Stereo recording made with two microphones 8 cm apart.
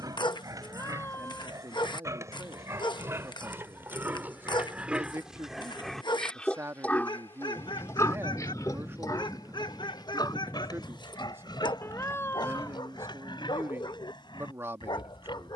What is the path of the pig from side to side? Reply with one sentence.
In this clip you hear the pig go from the right side to the left.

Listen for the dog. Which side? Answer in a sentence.
In this clip you hear the dog on the left.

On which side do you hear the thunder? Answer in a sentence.
In this clip you hear the thunder on the left.